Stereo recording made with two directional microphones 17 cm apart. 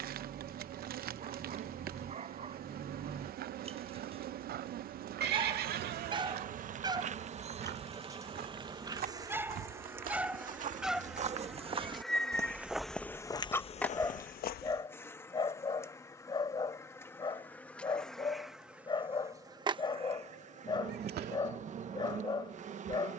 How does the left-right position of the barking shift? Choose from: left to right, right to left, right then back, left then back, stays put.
right to left.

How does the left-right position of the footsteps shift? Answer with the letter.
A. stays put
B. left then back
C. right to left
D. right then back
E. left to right
C.